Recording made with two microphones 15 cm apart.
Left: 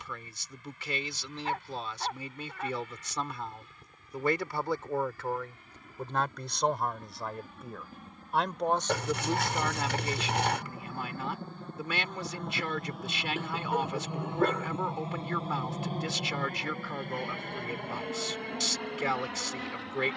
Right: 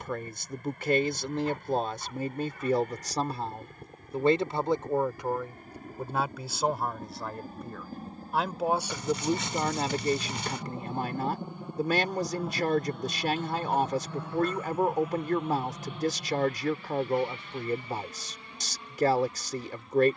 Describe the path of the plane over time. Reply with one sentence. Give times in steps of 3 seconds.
You can hear the plane on the right from 0 s, in the centre from 12 s and on the left from 15 s.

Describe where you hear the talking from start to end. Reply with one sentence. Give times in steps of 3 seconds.
In this clip you hear the talking on the right from 0 s, in the centre from 6 s and on the right from 9 s.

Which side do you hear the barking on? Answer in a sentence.
In this clip you hear the barking on the left.